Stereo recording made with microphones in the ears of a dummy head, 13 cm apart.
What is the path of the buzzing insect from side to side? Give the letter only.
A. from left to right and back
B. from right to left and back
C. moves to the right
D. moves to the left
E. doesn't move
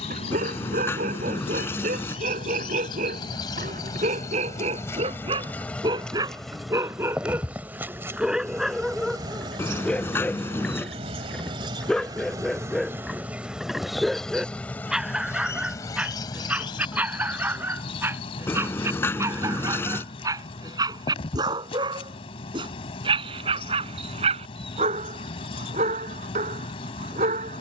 A.